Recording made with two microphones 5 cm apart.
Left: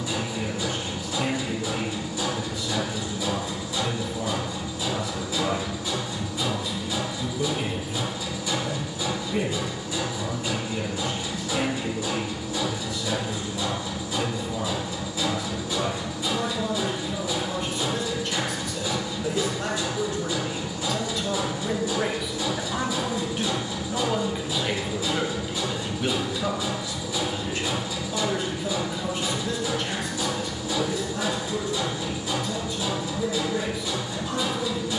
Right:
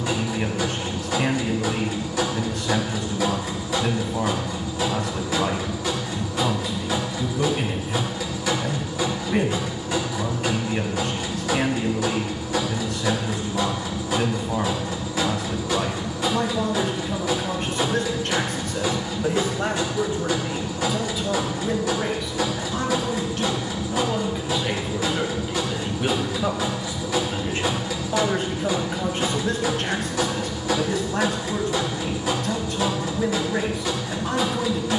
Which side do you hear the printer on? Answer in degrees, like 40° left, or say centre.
80° right.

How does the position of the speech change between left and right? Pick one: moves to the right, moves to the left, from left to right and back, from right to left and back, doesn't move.
from right to left and back.